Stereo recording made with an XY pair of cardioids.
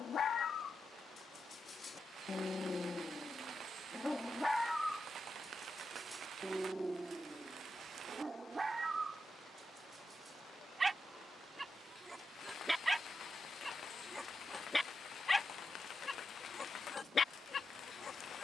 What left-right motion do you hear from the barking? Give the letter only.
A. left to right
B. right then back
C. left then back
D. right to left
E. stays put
B.